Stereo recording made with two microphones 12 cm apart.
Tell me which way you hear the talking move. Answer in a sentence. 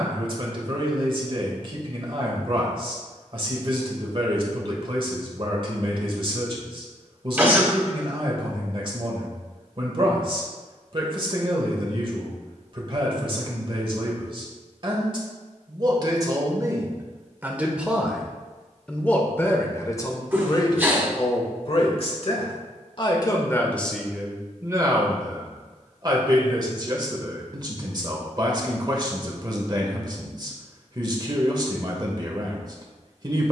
In this clip you hear the talking go left and come back.